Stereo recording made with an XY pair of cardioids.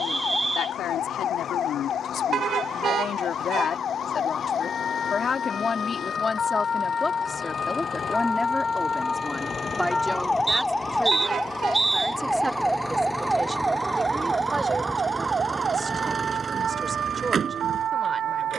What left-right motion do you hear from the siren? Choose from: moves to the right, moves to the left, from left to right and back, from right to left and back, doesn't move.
moves to the right.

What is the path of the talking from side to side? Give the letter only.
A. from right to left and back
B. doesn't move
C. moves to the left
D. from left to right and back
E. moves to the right
E.